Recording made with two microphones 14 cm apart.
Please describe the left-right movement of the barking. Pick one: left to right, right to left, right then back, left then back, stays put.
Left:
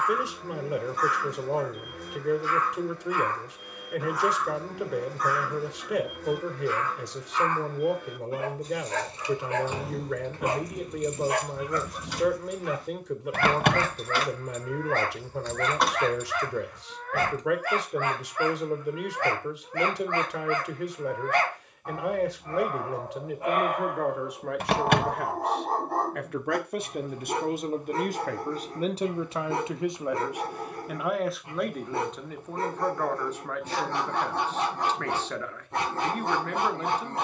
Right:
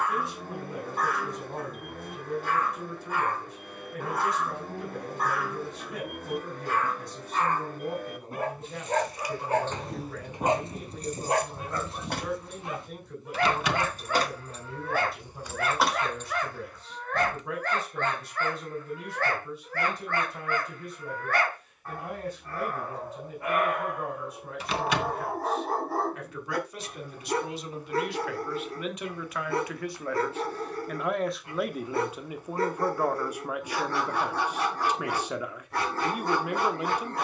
right to left.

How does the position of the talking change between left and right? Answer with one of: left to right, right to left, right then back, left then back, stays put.
left to right.